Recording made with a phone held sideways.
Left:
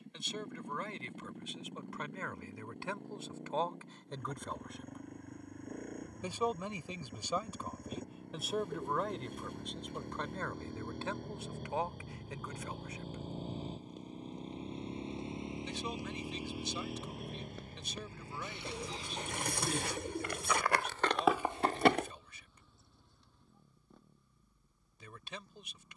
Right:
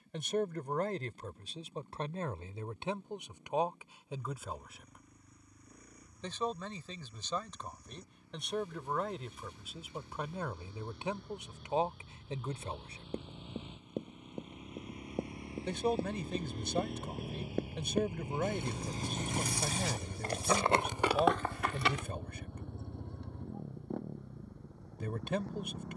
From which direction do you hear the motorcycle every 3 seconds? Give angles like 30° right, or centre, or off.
70° left, 70° left, 60° left, 50° left, 40° left, 10° left, 30° right, 60° right, 70° right.